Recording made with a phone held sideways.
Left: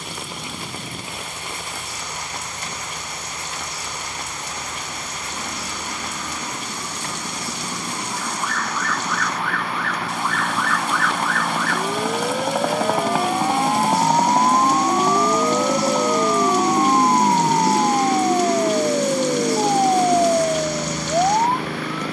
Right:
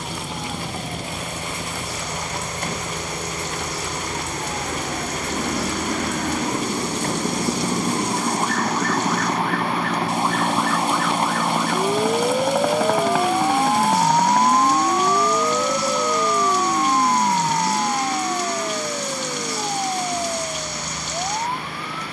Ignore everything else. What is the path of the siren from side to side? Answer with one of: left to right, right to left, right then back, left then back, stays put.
right to left.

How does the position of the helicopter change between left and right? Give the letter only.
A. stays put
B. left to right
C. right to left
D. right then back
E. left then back
C.